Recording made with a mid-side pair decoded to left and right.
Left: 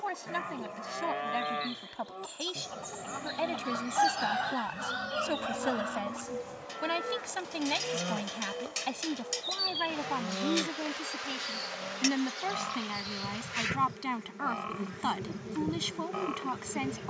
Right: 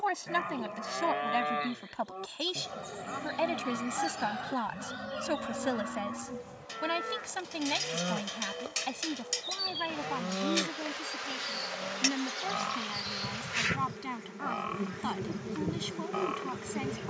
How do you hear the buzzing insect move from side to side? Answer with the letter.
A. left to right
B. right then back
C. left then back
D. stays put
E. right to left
A.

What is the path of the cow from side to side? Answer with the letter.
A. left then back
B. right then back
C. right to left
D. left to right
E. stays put
E.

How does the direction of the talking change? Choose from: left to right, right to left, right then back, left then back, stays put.
right to left.